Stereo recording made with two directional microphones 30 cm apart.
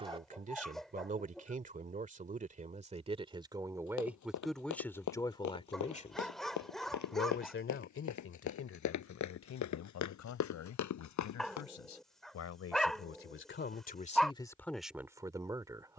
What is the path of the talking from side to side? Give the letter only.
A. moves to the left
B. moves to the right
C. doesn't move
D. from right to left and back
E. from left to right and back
D.